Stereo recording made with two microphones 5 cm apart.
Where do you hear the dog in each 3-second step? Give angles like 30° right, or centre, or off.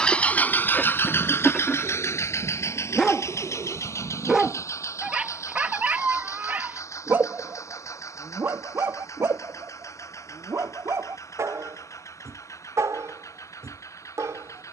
20° left, 10° right, 50° right, 70° right, 80° right.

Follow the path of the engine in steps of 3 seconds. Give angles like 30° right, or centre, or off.
50° left, 70° left, 80° left, 80° left, 80° left.